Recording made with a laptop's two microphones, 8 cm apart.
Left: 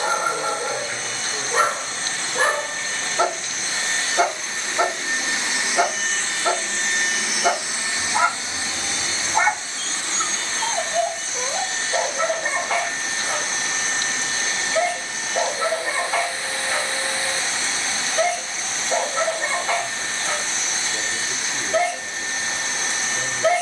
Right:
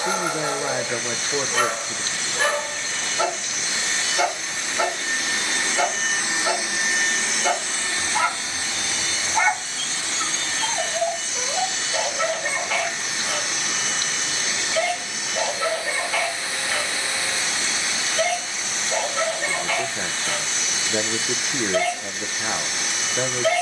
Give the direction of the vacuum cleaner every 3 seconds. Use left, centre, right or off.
left, left, centre, left, left, left, left, left.